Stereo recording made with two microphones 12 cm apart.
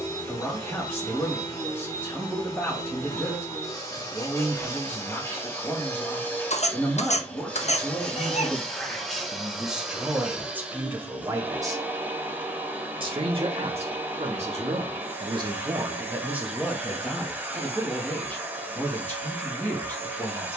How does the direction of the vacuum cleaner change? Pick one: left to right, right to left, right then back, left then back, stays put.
left to right.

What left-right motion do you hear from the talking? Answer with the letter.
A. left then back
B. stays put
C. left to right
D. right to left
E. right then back
E.